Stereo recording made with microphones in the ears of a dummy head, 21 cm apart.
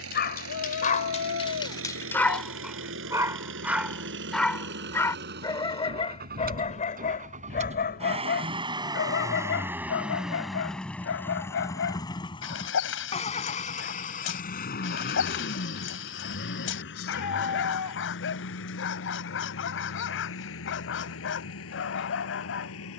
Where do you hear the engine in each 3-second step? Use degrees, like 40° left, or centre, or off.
60° right, 50° right, 30° right, centre, 30° left, 50° left, 60° left, 70° left.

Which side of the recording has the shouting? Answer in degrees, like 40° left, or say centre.
80° left.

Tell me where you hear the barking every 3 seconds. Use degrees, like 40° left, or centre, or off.
20° left, centre, 40° left, 60° left, 60° left, 60° left, 60° left, 60° left.